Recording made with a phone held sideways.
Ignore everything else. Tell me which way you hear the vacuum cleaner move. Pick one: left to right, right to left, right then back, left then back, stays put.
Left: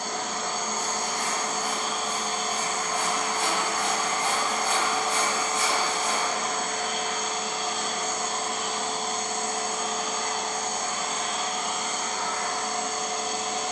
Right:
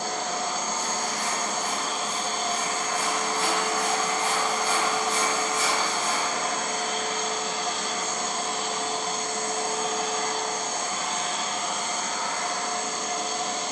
stays put.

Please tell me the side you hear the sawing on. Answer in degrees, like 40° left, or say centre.
60° left.